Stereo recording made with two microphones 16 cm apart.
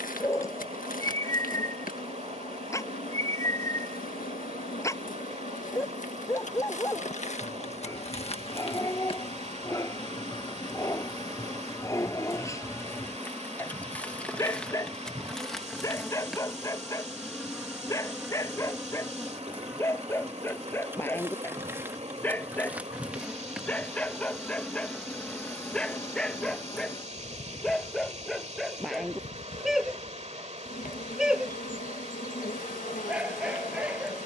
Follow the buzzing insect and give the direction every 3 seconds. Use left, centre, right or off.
left, left, left, left, centre, centre, centre, centre, centre, left, left, left.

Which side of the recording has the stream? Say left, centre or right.
right.